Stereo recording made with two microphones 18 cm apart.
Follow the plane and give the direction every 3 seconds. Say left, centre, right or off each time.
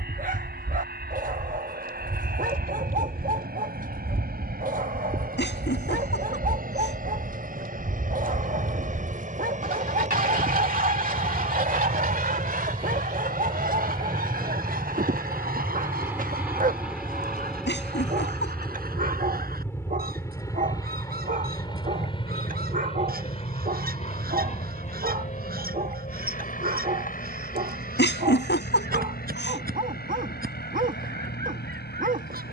right, right, right, right, right, centre, centre, left, left, left, left.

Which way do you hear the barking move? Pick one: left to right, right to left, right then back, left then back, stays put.
stays put.